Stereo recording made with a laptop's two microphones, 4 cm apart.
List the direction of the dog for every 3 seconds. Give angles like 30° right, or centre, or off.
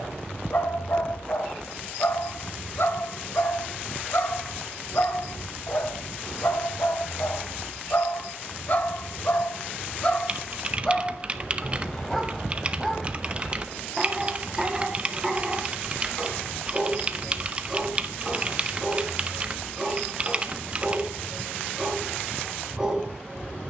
60° left, 60° left, 60° left, 30° left, centre, 10° right, 10° right, 10° right.